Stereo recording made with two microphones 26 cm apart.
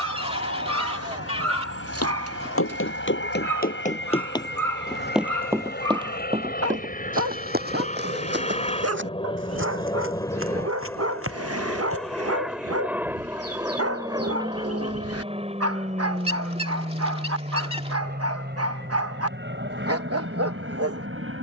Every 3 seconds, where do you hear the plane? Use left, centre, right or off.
left, left, left, centre, centre, right, right.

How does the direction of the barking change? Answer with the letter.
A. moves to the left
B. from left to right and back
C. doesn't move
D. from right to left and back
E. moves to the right
C.